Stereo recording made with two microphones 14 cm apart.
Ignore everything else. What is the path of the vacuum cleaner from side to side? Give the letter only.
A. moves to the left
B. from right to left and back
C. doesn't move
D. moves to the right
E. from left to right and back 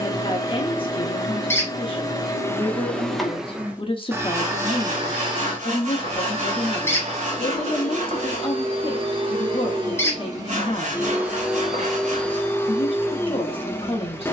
E.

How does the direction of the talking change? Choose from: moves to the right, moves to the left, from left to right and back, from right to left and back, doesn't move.
doesn't move.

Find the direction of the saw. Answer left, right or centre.
right.